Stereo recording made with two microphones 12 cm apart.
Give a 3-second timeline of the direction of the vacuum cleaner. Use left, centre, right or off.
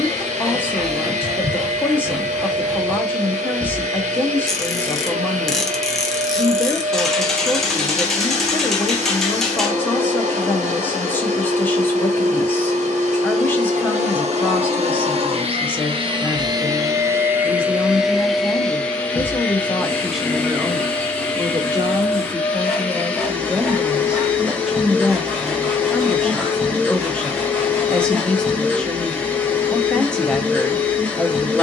right, right, right, right, right, right, centre, centre, centre, centre, centre.